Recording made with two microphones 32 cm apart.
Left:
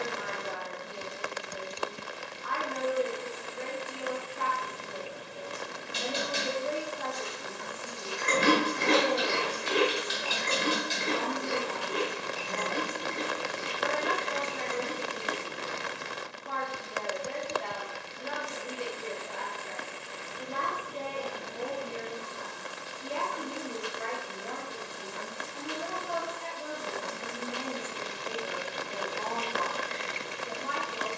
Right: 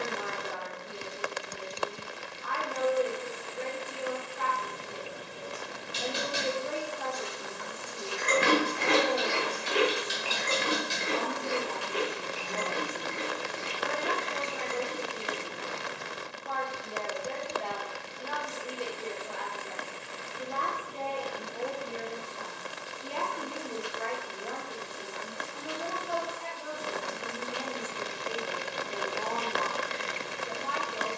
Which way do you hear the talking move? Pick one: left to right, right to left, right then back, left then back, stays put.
stays put.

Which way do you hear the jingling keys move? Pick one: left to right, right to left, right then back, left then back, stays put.
left then back.